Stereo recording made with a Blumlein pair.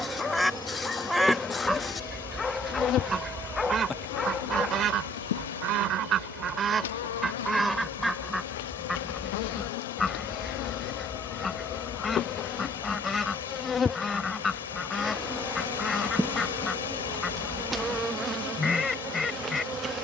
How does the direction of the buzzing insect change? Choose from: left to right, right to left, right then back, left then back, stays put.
left then back.